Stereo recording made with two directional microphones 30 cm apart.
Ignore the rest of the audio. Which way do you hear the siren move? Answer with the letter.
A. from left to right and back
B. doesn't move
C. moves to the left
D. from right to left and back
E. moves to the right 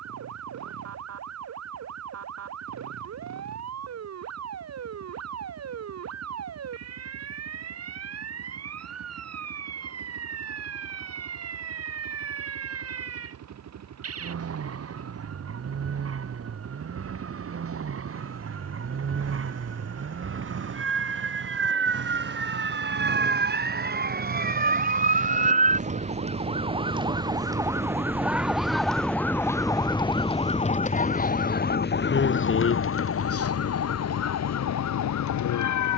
C.